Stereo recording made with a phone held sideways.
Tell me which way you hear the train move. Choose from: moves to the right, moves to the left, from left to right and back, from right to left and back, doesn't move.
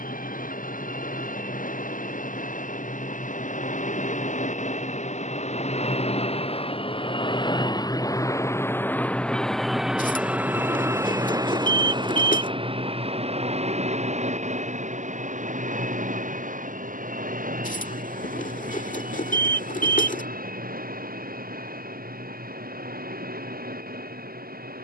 moves to the right.